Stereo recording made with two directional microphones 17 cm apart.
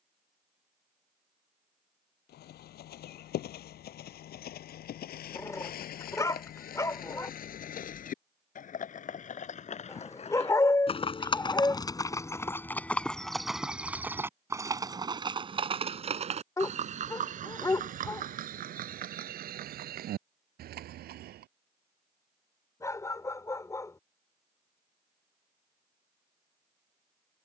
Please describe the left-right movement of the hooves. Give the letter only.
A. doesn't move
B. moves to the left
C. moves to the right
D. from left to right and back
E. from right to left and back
C.